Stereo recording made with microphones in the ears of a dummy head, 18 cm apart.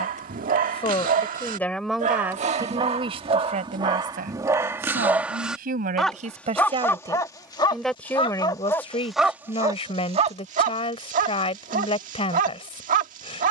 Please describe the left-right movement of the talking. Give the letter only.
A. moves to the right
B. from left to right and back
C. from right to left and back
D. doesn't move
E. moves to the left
B.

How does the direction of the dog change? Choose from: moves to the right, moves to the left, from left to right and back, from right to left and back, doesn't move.
from right to left and back.